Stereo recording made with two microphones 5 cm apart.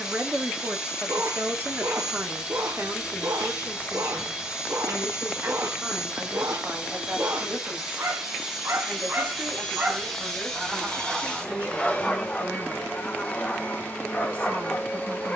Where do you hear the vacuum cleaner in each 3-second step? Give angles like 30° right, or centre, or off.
20° right, 20° right, 10° right, 10° left, 30° left.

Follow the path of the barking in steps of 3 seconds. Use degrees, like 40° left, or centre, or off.
70° right, 70° right, 60° right, 20° right, 20° left.